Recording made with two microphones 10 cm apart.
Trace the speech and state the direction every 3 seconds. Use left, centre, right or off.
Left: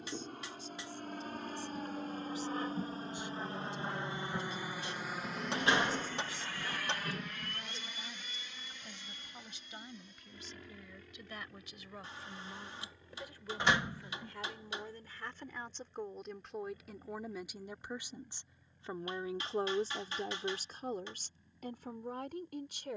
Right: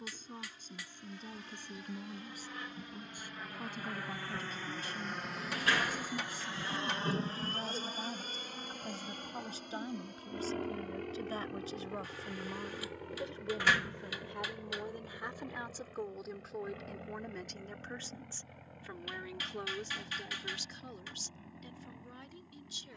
right, right, right, right, right, centre, left, left.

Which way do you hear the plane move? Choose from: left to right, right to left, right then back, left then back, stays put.
left to right.